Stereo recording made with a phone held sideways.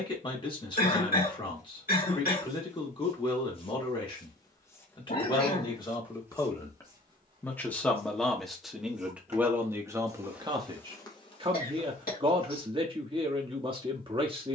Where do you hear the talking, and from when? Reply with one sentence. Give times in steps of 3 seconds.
You can hear the talking on the left from 0 s, in the centre from 6 s and on the right from 9 s.